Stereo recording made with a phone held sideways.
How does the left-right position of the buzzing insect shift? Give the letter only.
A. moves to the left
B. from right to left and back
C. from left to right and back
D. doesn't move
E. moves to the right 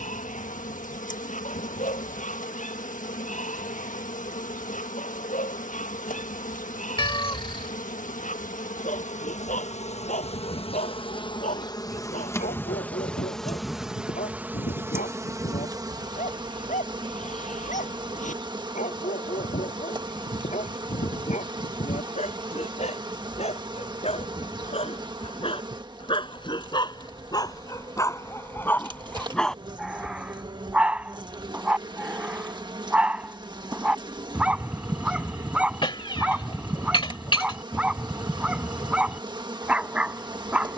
E.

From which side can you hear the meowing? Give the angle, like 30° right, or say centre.
30° left.